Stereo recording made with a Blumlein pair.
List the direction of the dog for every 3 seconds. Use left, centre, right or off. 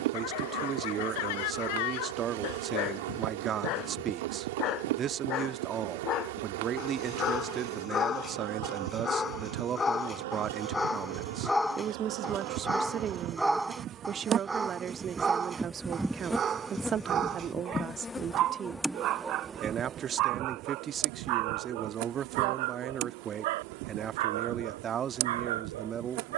left, left, left, centre, centre, right, right, right, right.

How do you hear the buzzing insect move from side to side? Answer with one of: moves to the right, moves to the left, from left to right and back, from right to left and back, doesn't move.
from right to left and back.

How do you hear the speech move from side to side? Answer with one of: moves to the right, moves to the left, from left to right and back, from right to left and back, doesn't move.
doesn't move.